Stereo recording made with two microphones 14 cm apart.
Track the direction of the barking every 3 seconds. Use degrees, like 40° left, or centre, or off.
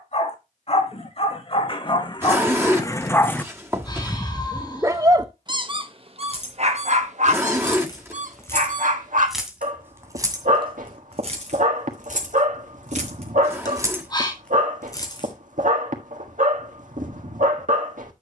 40° left, 10° right, 60° right, 70° right, 70° right, 70° right.